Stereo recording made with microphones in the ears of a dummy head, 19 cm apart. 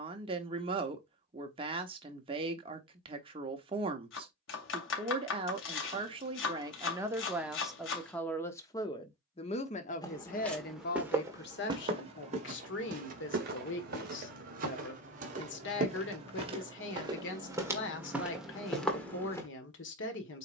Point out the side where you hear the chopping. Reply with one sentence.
You can hear the chopping on the left.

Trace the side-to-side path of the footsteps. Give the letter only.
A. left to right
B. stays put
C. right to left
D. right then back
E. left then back
D.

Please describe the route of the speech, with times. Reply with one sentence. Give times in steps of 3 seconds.
In this clip you hear the speech on the right from 0 s, in the centre from 6 s and on the left from 9 s.